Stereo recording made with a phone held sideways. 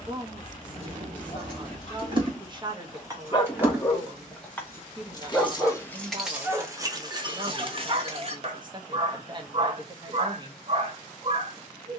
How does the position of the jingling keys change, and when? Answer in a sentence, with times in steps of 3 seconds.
In this clip you hear the jingling keys on the right from 0 s, in the centre from 3 s, on the right from 6 s and not at all from 9 s.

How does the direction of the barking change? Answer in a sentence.
In this clip you hear the barking move from left to right.